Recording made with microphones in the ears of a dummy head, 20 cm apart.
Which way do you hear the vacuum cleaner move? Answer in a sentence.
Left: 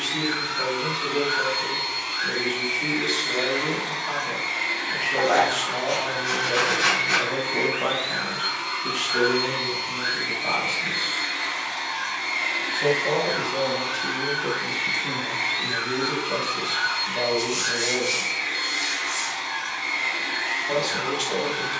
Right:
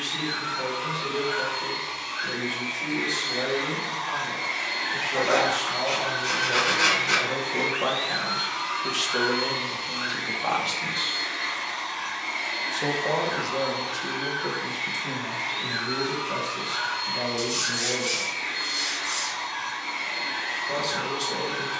You can hear the vacuum cleaner move from left to right and back again.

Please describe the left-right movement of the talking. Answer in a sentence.
In this clip you hear the talking go right and come back.